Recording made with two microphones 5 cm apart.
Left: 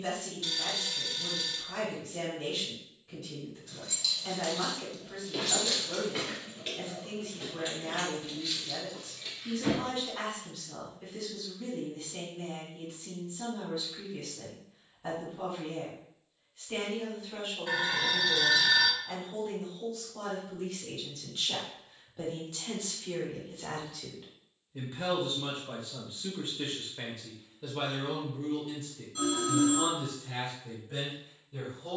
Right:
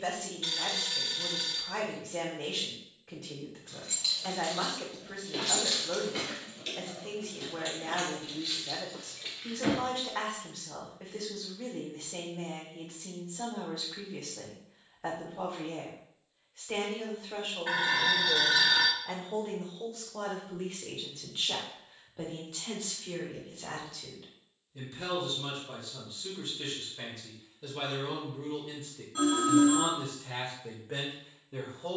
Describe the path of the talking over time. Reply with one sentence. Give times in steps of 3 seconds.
In this clip you hear the talking on the right from 0 s, in the centre from 21 s, on the left from 24 s, in the centre from 27 s and on the right from 30 s.